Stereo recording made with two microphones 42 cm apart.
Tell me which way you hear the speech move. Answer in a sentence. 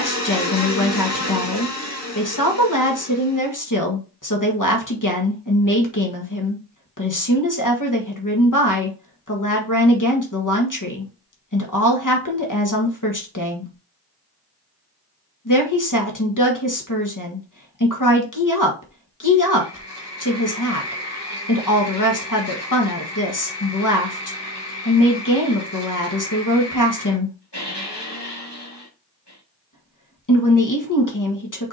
You can hear the speech stay put.